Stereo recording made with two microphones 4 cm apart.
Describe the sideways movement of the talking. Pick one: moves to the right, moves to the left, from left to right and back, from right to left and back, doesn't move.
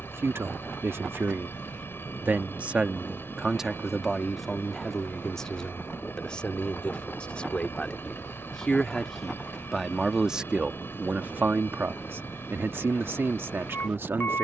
from right to left and back.